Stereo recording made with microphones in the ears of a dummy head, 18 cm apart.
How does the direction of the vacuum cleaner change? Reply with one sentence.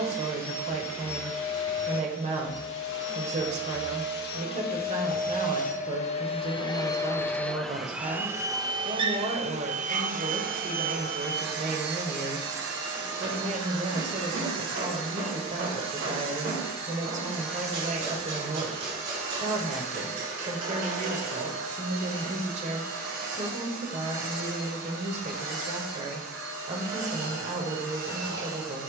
You can hear the vacuum cleaner go from the left side to the right.